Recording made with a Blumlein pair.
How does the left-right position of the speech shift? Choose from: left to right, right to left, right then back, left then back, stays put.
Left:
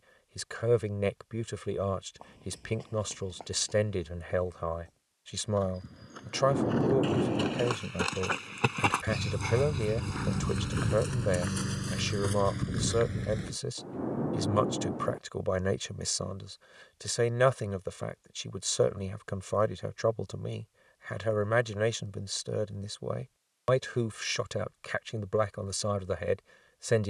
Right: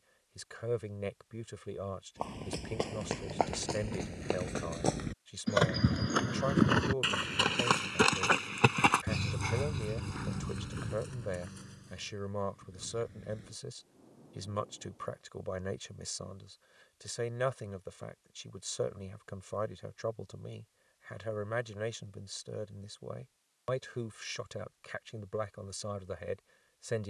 stays put.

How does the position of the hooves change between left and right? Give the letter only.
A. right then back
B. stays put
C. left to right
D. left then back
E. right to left
E.